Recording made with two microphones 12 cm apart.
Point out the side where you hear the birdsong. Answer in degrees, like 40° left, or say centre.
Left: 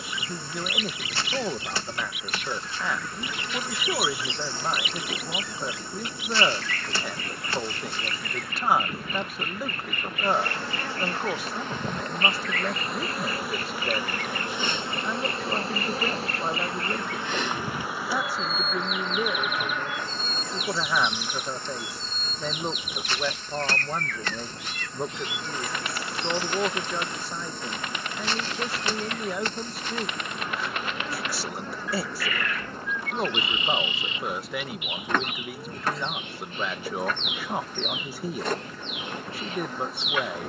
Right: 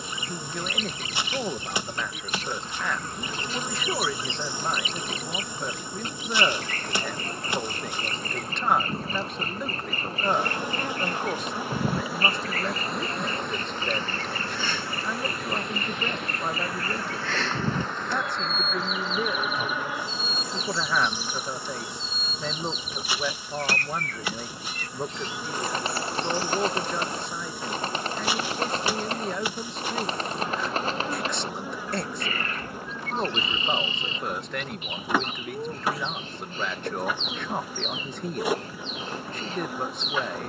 30° right.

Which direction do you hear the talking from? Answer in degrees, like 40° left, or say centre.
centre.